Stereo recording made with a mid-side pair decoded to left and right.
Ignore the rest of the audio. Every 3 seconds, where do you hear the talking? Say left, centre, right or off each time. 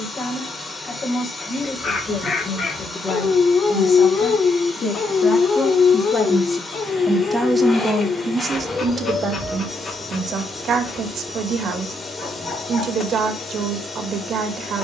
left, left, centre, right, right.